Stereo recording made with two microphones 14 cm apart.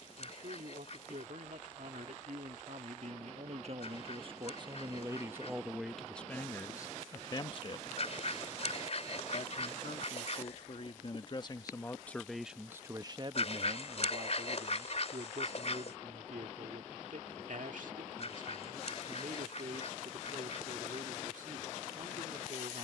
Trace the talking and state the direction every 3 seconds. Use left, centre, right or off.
right, right, left, left, right, right, right, right.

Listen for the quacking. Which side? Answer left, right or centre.
left.